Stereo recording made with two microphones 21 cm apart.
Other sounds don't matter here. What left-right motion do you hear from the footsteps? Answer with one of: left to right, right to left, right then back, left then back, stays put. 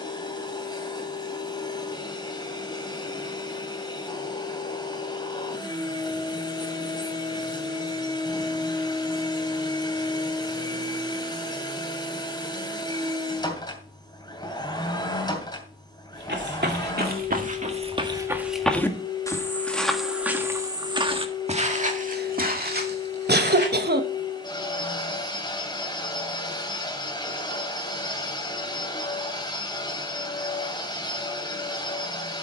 left then back.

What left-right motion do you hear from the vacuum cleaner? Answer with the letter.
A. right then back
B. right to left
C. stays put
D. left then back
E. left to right
C.